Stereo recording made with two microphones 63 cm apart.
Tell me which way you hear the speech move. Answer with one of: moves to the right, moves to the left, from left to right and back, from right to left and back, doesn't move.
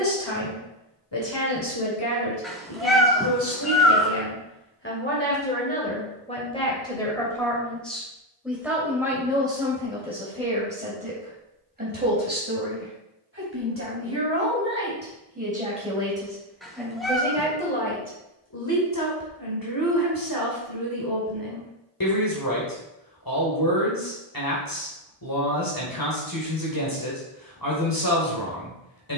from left to right and back.